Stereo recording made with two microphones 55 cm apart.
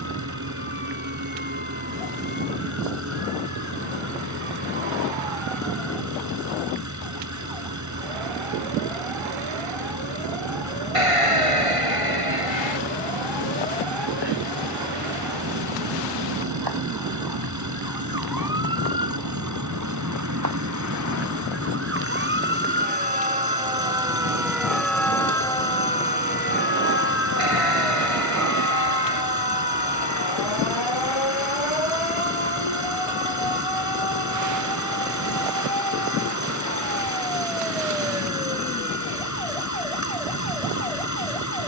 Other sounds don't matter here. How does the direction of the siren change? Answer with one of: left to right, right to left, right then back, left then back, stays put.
right to left.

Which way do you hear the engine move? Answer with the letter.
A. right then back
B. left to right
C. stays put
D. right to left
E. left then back
C.